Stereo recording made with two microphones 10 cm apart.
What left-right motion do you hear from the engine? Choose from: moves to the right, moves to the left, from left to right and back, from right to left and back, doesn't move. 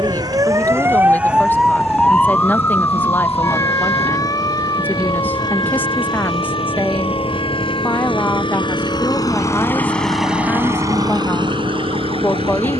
moves to the right.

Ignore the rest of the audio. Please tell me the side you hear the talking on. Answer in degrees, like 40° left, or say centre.
20° left.